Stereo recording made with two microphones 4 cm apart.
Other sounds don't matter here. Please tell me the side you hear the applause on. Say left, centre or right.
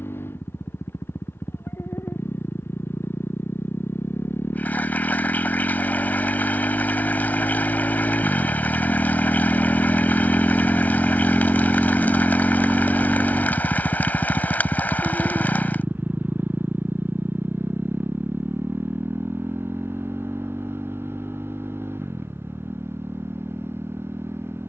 left.